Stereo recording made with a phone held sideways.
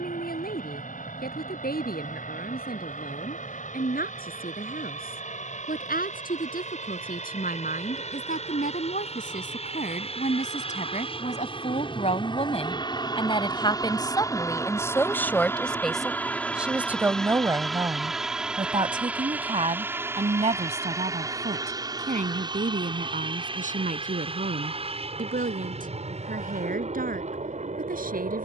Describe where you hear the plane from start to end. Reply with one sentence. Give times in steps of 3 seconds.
In this clip you hear the plane on the left from 0 s, in the centre from 15 s and on the right from 21 s.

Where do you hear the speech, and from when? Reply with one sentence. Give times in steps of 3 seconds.
In this clip you hear the speech on the left from 0 s, in the centre from 15 s and on the right from 18 s.